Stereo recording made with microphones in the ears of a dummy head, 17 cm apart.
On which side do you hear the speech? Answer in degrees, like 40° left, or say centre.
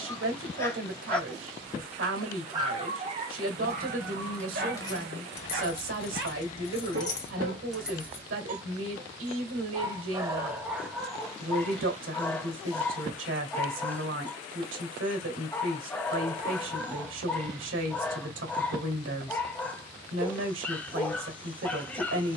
70° right.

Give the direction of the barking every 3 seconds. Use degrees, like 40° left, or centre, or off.
centre, 50° right, 50° right, 10° right, 10° left, 10° left, 10° left, 10° left.